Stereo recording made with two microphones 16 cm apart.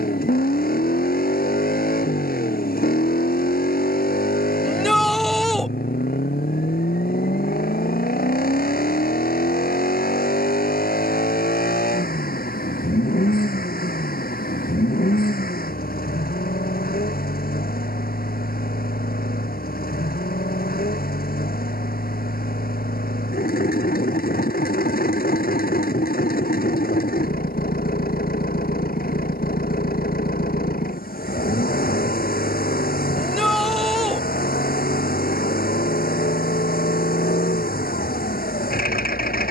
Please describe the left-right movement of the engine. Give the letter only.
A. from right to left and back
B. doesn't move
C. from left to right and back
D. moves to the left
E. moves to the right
B.